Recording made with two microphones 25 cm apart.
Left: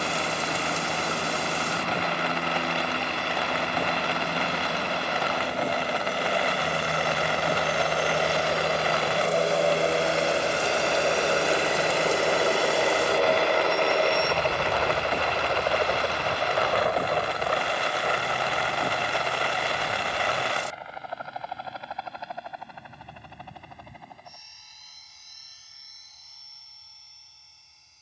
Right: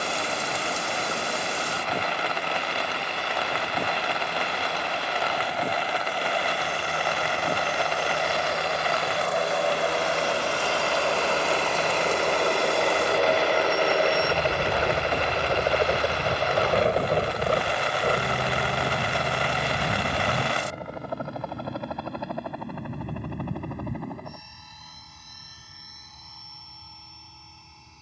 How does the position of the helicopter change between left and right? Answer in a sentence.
In this clip you hear the helicopter travel towards the right.